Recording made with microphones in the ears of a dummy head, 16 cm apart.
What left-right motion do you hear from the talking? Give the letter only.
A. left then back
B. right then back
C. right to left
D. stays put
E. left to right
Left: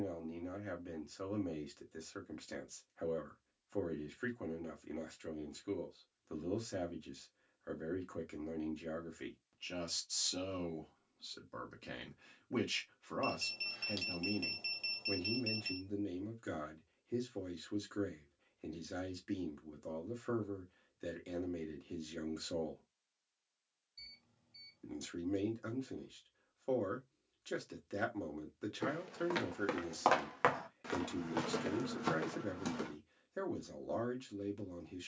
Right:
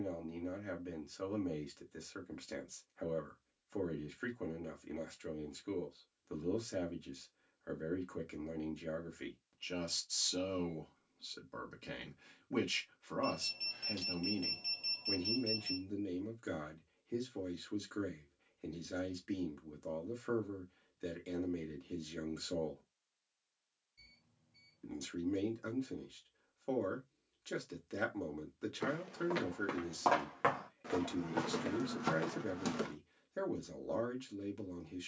D.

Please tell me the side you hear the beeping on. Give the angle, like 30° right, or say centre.
40° left.